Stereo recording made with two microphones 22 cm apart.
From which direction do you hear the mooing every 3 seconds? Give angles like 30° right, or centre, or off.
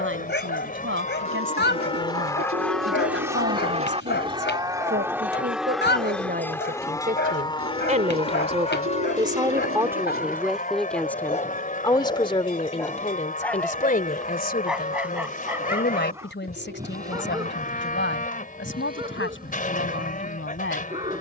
30° left, 10° right, 20° left, 40° left, 40° left, 40° left, 40° left.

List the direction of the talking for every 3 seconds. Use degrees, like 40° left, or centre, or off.
70° right, 60° right, 40° right, centre, 30° left, 60° left, 70° left.